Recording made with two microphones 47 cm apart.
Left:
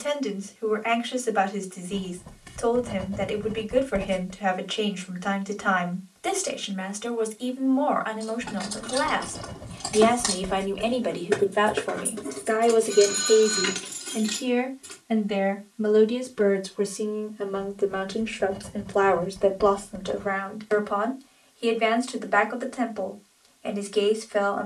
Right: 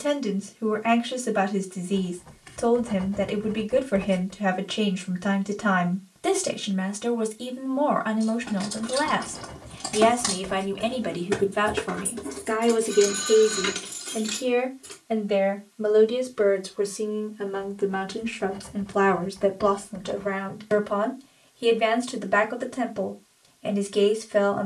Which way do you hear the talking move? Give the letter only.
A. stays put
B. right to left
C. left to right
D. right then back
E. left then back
E.